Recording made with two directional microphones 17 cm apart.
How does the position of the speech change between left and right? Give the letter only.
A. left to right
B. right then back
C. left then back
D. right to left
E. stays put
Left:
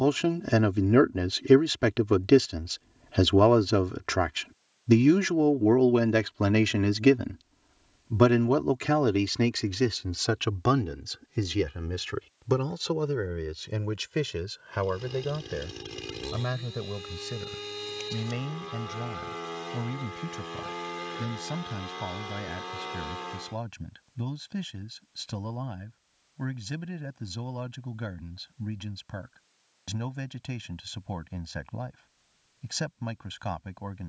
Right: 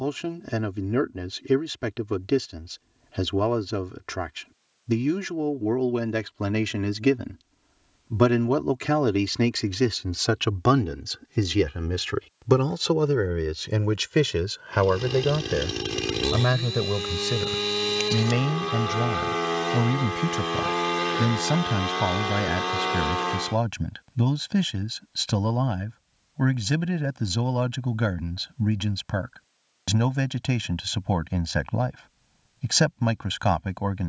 A.